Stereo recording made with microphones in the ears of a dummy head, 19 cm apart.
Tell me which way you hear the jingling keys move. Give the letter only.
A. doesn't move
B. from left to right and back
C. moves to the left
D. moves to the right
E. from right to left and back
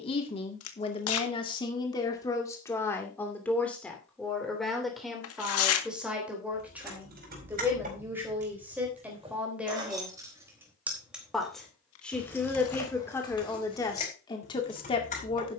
C.